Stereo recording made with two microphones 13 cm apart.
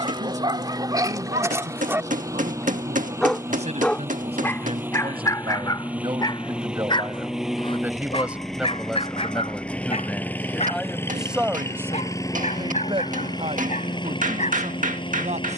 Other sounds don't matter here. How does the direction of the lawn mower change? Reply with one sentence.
In this clip you hear the lawn mower travel towards the left.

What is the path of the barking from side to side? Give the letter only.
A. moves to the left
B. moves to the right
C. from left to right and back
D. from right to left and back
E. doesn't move
A.